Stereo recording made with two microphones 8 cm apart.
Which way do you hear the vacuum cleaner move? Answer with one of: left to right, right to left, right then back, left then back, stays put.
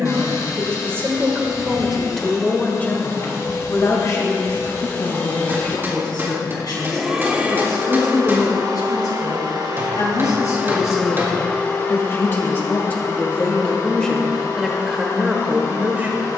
right then back.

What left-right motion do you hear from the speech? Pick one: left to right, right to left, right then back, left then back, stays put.
left then back.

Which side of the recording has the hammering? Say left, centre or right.
right.